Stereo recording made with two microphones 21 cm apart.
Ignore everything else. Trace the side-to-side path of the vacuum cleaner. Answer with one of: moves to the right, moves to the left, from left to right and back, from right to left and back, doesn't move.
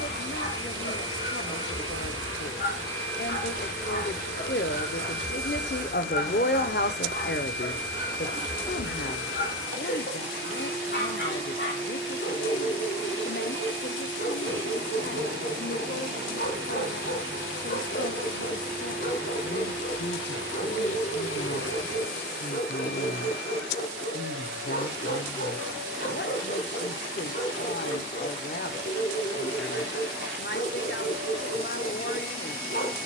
doesn't move.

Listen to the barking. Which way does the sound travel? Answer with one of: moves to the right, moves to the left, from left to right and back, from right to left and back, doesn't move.
doesn't move.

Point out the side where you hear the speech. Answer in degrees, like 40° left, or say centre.
60° left.